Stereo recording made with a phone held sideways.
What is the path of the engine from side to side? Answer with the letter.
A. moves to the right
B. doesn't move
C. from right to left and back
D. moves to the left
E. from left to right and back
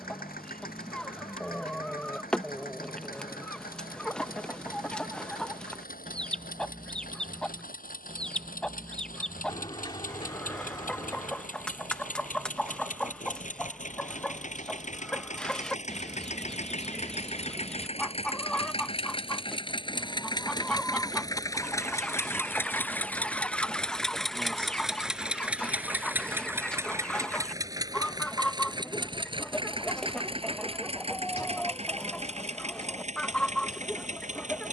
A.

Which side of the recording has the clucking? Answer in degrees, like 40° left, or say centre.
10° left.